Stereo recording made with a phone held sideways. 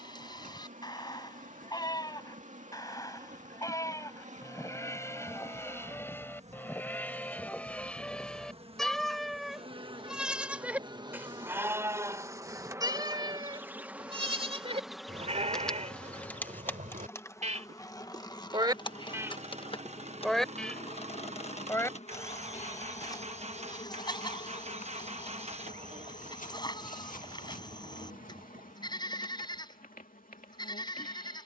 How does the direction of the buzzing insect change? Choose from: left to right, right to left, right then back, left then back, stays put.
right to left.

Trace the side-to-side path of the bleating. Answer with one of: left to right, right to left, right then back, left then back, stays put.
right then back.